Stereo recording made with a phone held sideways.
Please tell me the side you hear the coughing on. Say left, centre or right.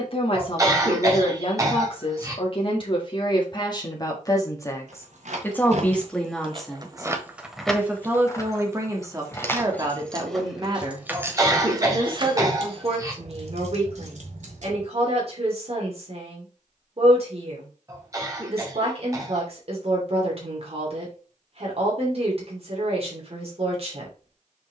right.